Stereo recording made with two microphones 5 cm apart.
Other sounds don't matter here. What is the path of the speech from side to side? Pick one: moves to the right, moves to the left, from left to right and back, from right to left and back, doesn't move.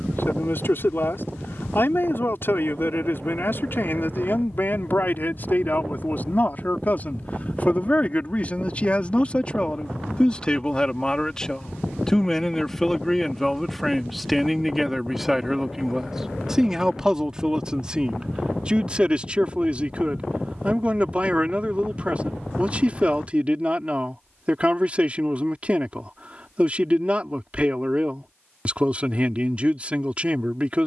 moves to the right.